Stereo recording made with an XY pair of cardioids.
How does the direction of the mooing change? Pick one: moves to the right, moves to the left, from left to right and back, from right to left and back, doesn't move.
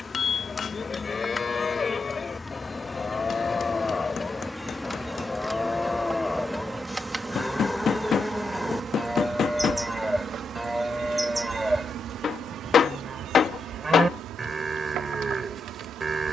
moves to the right.